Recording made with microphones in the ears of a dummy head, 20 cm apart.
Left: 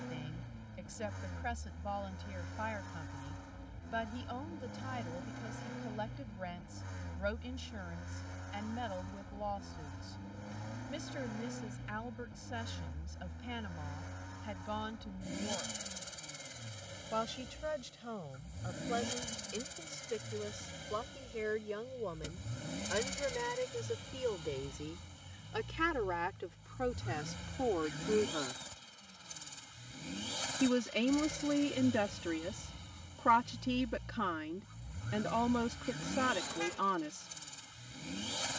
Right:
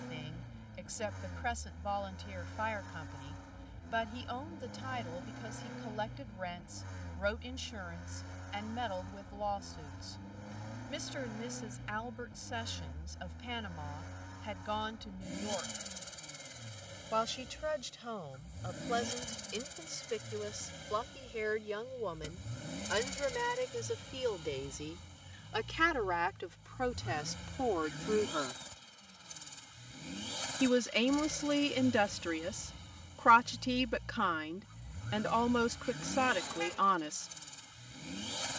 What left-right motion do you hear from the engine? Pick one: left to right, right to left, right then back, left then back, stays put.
stays put.